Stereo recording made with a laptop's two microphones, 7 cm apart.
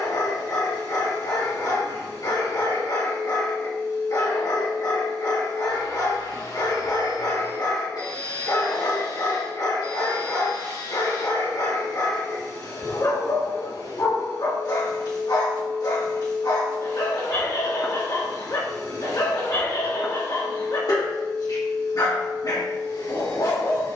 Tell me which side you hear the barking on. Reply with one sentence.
You can hear the barking on the left.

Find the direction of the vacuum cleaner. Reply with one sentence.
You can hear the vacuum cleaner on the left.